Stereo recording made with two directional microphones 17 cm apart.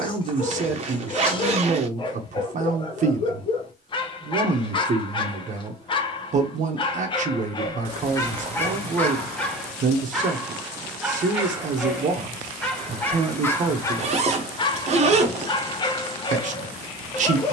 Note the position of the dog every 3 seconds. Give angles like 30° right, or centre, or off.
30° left, 30° left, 20° left, centre, 10° left, 30° left.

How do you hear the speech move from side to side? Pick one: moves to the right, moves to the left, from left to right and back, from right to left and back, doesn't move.
doesn't move.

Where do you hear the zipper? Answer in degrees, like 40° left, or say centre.
40° right.